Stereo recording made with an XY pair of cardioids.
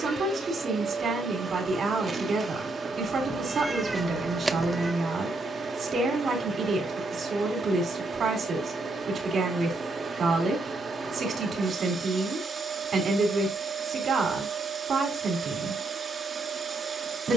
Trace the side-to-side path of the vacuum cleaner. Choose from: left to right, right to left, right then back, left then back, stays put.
stays put.